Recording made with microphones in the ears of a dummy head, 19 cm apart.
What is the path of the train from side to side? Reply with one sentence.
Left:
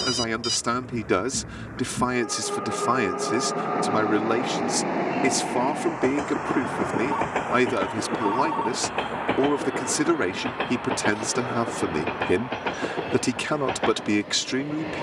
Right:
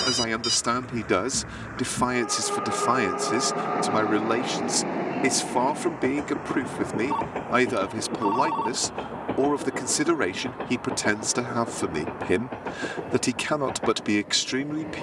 You can hear the train move to the left.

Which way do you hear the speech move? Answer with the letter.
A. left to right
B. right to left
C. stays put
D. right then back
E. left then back
C.